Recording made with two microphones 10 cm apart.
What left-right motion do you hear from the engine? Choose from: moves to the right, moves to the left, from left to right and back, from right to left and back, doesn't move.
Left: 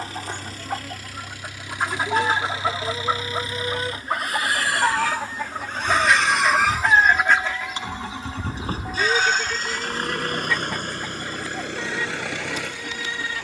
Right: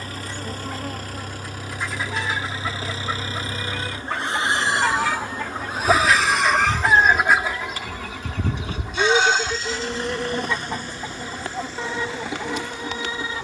moves to the left.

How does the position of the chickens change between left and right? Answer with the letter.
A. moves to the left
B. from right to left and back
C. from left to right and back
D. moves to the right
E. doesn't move
D.